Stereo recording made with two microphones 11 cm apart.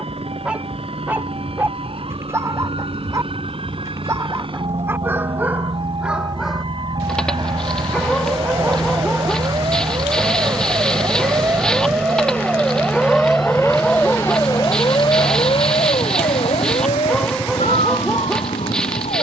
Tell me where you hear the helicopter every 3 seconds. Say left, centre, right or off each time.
right, right, right, centre, left, left, left.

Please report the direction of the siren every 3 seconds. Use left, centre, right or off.
right, right, right, right, centre, left, left.